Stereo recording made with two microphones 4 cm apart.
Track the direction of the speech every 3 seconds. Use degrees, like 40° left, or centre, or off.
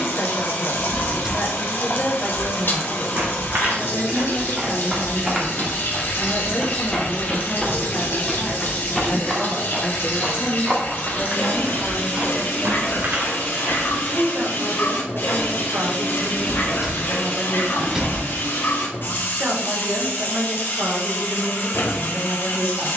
40° left, 40° left, 30° left, 10° left, 30° right, 60° right, 60° right, 60° right.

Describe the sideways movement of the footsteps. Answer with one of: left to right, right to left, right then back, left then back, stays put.
left then back.